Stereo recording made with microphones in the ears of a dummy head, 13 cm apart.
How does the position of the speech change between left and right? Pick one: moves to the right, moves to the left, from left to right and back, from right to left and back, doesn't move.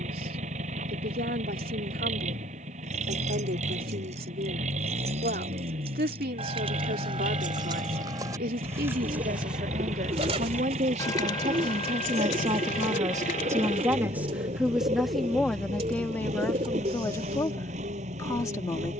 moves to the left.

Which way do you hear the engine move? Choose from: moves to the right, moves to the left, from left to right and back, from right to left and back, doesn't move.
doesn't move.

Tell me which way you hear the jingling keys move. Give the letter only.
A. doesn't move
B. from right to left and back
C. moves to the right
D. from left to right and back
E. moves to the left
E.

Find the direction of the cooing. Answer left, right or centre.
right.